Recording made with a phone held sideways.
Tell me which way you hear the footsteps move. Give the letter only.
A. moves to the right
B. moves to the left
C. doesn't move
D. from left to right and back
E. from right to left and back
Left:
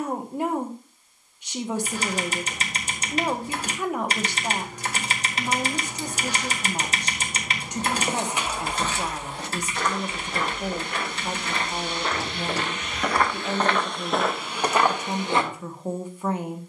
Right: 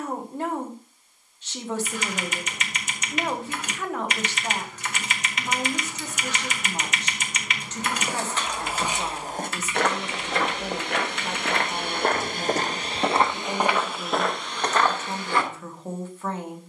D.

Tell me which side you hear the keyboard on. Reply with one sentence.
You can hear the keyboard on the left.